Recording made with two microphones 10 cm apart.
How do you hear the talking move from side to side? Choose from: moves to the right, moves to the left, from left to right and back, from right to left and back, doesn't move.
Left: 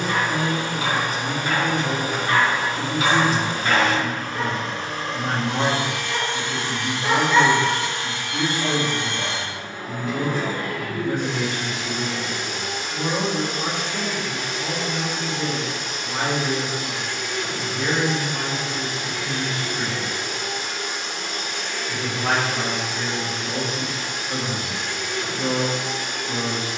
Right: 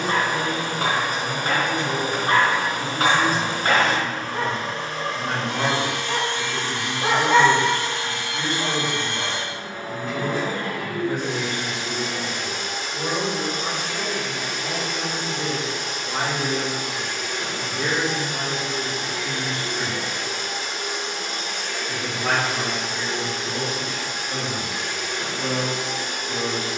from left to right and back.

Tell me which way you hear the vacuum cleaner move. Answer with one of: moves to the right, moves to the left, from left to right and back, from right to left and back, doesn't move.
doesn't move.